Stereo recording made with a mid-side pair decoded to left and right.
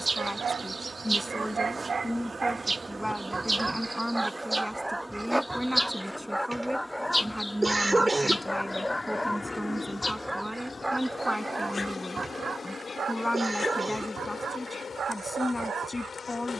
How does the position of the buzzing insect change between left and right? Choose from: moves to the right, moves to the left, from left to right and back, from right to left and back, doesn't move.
moves to the left.